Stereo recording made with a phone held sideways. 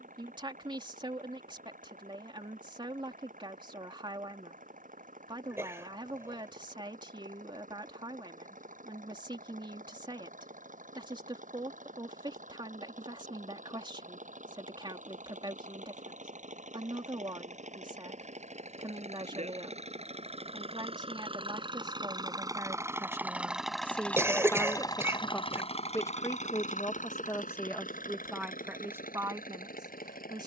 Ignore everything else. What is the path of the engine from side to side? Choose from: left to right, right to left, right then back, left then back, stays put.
right to left.